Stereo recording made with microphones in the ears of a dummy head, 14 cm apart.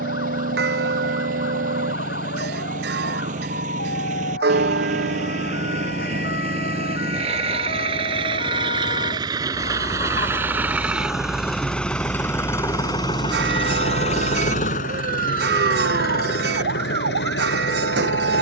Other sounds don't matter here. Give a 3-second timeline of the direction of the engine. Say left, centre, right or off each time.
right, right, right, centre, left, left.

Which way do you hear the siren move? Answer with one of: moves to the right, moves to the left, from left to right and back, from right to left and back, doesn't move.
moves to the right.